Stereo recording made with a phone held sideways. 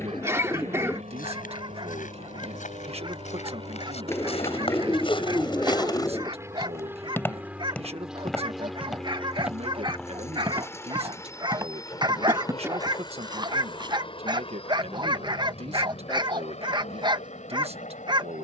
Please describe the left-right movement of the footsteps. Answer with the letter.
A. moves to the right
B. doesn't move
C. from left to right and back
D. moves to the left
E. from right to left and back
A.